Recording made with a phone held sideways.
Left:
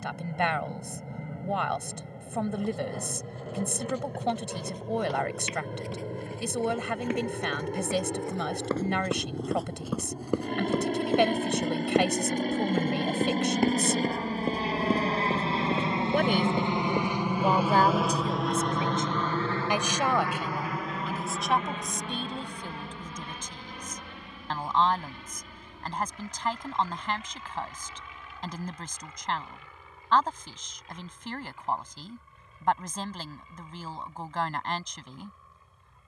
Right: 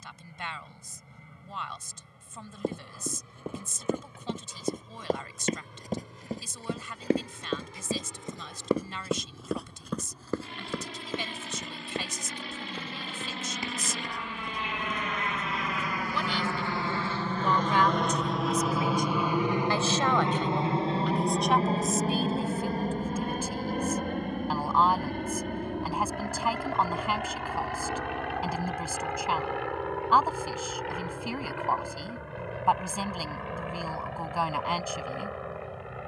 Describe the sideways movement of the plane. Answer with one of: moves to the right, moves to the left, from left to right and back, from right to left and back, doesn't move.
moves to the right.